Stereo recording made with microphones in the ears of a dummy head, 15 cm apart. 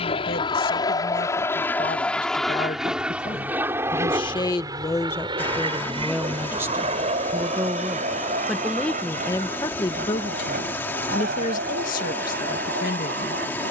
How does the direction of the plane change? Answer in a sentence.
In this clip you hear the plane move from left to right.